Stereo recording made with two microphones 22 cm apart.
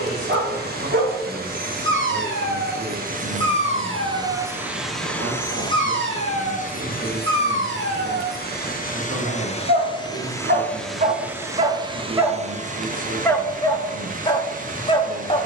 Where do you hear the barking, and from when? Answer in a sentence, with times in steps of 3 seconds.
You can hear the barking on the right from 0 s and in the centre from 12 s.